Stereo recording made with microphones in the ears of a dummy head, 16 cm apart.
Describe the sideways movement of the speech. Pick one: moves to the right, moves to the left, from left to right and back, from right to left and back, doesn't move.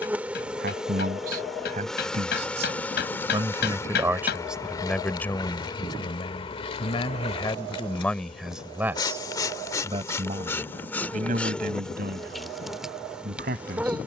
from right to left and back.